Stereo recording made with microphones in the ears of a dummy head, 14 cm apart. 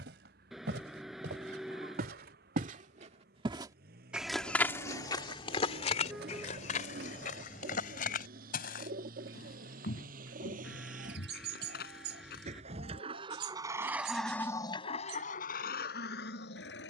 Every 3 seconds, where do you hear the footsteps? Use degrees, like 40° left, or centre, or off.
70° right, 10° left, 60° left, 70° left, 70° left, off.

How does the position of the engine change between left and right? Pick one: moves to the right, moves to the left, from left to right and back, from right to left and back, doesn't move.
moves to the left.